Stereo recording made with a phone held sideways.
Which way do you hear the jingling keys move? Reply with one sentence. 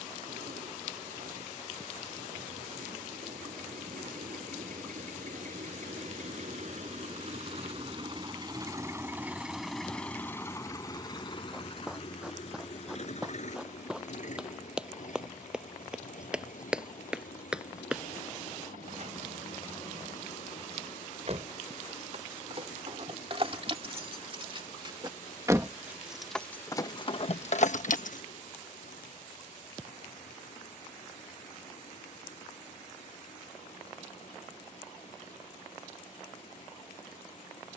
You can hear the jingling keys travel towards the left.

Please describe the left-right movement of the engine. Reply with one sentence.
In this clip you hear the engine move from right to left.